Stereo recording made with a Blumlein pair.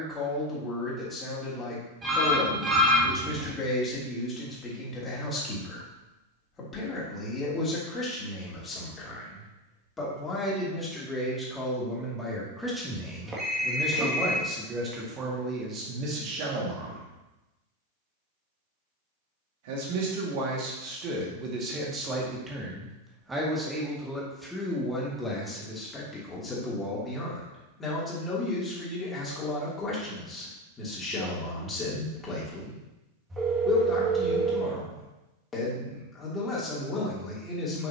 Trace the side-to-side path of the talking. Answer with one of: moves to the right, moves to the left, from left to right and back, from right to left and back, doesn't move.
from left to right and back.